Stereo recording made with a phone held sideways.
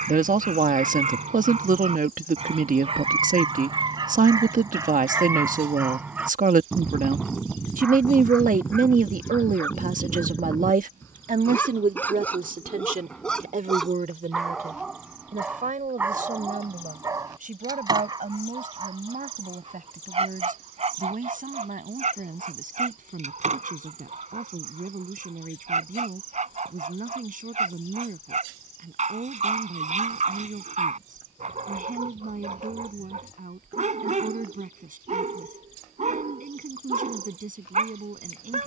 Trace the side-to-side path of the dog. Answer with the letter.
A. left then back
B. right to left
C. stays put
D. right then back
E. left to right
A.